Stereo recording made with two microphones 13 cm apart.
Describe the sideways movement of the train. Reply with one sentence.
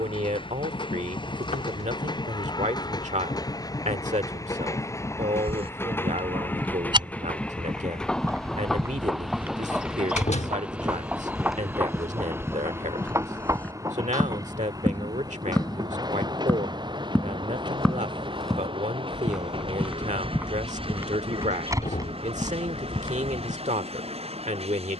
In this clip you hear the train travel towards the right.